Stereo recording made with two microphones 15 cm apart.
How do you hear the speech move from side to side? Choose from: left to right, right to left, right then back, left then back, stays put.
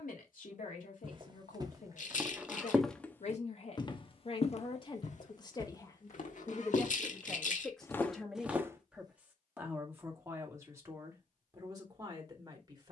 left to right.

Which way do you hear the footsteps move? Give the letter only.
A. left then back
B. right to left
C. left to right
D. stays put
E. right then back
A.